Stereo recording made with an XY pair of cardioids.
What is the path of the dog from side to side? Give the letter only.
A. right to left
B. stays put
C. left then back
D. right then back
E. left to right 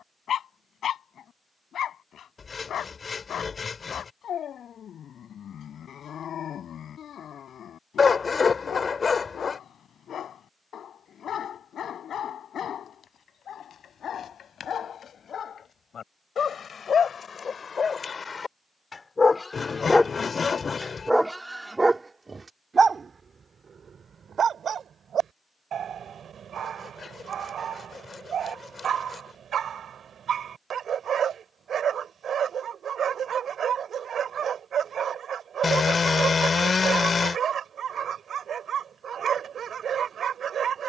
E.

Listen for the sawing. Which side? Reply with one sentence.
In this clip you hear the sawing on the left.